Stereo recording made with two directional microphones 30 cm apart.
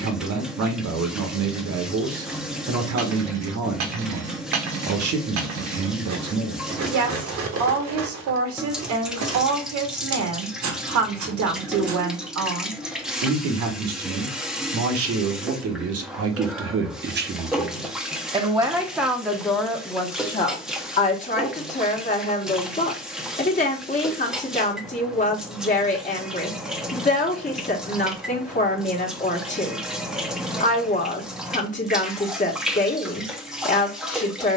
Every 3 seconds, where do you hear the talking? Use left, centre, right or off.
right, right, right, right, right, right, centre, left, left, left, left, left.